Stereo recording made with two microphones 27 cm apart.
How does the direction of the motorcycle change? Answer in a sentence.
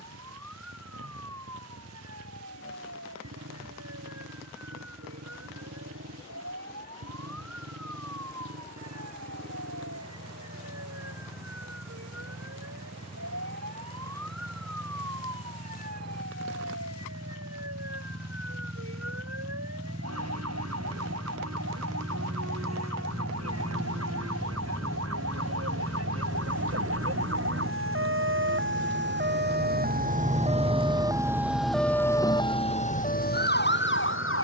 You can hear the motorcycle move to the left.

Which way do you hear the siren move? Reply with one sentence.
In this clip you hear the siren move to the left.